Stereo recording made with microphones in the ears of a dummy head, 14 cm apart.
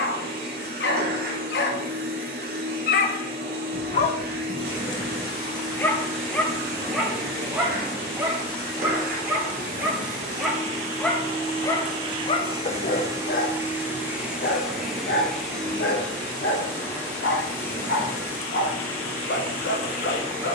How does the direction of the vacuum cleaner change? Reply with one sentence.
In this clip you hear the vacuum cleaner move to the left.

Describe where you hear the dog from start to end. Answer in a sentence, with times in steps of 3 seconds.
In this clip you hear the dog on the left from 0 s, in the centre from 6 s and on the left from 12 s.